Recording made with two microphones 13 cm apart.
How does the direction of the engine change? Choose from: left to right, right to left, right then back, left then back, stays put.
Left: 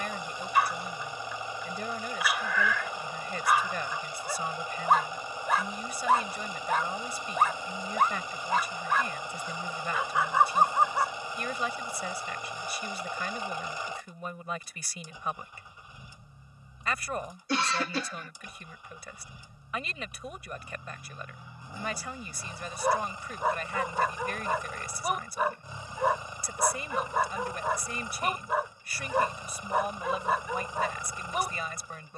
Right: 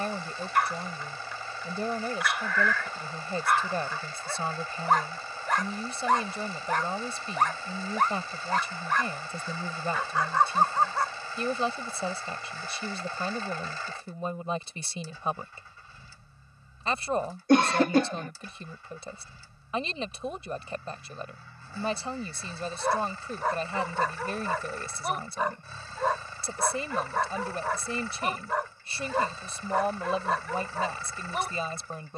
stays put.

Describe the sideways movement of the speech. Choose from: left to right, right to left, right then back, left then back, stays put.
stays put.